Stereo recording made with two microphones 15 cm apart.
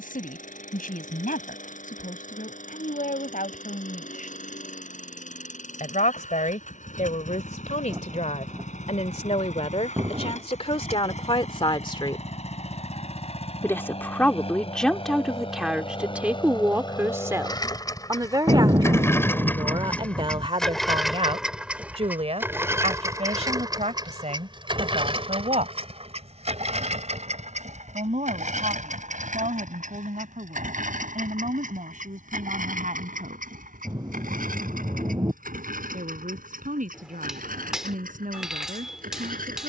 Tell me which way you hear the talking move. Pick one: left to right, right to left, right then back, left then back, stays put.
left to right.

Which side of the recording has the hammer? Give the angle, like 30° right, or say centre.
centre.